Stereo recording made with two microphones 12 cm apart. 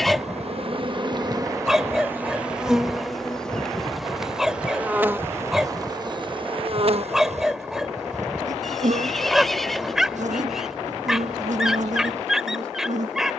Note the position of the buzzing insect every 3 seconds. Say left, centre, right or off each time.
right, centre, right, right, right.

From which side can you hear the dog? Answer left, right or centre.
centre.